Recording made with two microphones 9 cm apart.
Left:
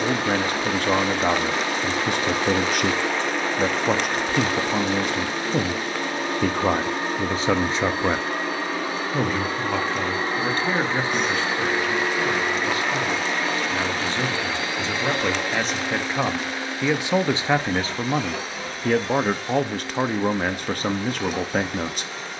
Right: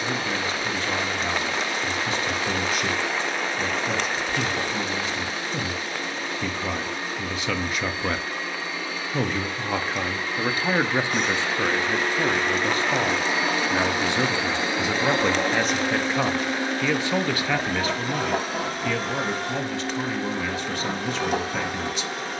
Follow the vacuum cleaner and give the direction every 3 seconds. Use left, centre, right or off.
left, left, left, left, centre, right, right, right.